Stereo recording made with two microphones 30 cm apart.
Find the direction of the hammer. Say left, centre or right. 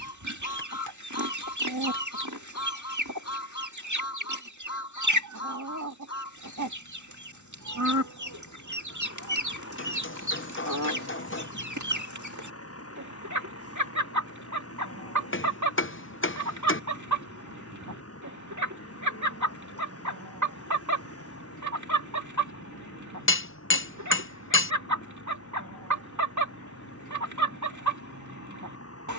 left.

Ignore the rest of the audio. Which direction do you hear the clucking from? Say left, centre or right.
right.